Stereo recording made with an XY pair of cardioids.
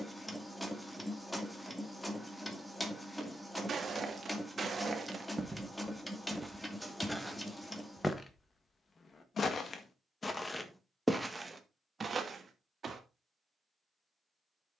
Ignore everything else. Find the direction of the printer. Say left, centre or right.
centre.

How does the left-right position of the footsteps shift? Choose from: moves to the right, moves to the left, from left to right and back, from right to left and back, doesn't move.
from right to left and back.